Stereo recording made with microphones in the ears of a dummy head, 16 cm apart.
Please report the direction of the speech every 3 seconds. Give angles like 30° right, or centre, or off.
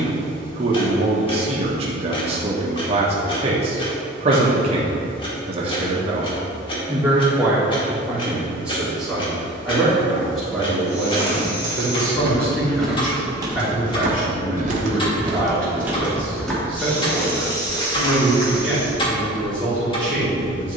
30° right, 30° right, 10° right, centre, 10° left, 10° left, 10° left.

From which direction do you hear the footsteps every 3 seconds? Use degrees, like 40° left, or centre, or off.
off, off, off, 30° left, 10° right, centre, 20° left.